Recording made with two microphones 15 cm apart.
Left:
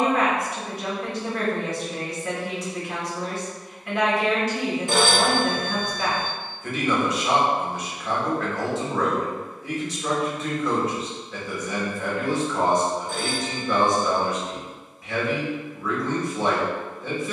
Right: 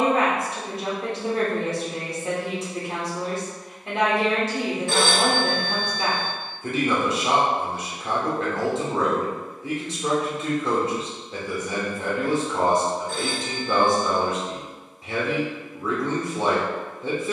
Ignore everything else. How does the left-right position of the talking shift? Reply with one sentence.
In this clip you hear the talking stay put.